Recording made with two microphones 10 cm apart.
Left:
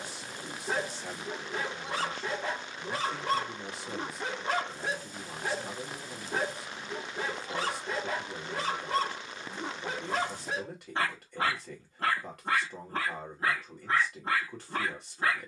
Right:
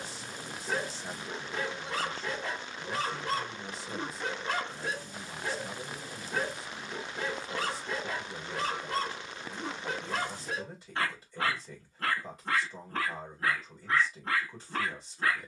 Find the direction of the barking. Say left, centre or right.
left.